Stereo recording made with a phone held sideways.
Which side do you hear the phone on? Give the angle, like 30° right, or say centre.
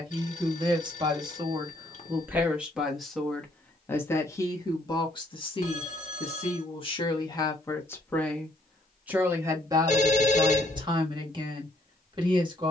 50° left.